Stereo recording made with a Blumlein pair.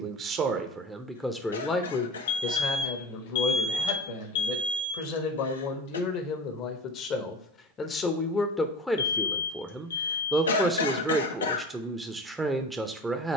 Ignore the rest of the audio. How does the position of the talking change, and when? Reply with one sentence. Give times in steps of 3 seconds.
In this clip you hear the talking in the centre from 0 s, on the left from 3 s and in the centre from 9 s.